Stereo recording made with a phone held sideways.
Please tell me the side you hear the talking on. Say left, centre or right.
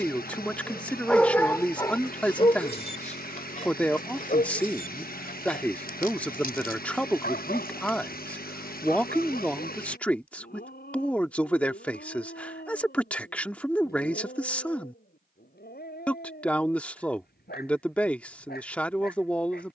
centre.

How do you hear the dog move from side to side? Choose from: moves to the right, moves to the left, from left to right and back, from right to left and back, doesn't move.
moves to the left.